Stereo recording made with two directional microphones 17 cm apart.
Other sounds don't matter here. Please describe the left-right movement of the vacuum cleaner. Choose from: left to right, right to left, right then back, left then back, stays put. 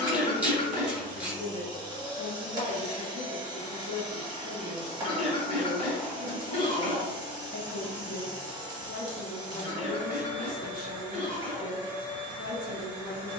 stays put.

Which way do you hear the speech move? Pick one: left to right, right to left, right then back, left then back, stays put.
stays put.